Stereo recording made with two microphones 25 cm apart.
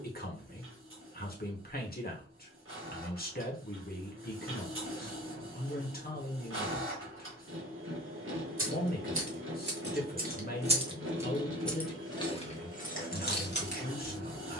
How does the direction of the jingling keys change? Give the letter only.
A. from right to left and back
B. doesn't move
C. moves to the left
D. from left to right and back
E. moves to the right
C.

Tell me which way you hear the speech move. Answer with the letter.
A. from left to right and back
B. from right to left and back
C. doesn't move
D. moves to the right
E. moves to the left
C.